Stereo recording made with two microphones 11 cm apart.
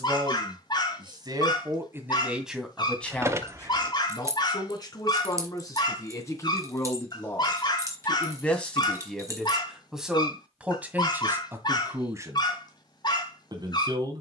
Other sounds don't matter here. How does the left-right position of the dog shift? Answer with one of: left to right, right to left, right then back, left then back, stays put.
stays put.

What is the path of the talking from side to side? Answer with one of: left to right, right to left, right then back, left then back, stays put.
left then back.